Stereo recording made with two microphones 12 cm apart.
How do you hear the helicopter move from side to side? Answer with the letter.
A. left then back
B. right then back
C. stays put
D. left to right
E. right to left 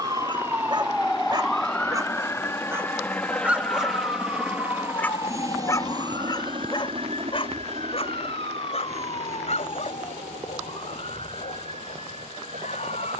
D.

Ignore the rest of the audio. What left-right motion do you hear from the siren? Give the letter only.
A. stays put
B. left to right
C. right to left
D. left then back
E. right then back
C.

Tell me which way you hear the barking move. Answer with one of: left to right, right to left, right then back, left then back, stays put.
right to left.